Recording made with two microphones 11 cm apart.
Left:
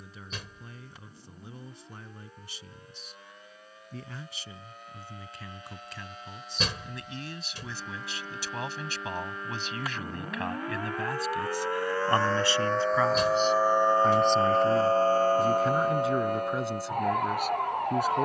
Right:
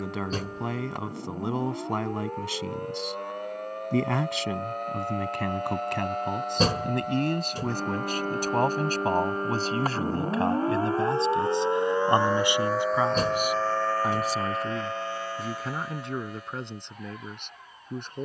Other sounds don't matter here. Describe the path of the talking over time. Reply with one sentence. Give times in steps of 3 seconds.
In this clip you hear the talking on the right from 0 s and in the centre from 12 s.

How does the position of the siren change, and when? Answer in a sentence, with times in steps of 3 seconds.
You can hear the siren on the right from 0 s, in the centre from 12 s and on the left from 15 s.